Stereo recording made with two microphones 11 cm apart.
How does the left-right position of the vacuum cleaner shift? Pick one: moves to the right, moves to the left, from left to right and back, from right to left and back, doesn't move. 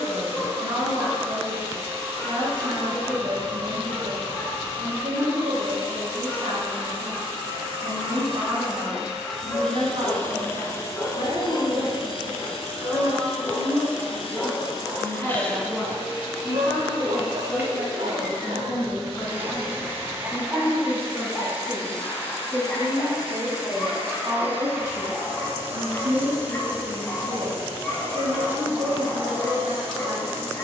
from right to left and back.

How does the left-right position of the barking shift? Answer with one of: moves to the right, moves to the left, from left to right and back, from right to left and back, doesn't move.
from left to right and back.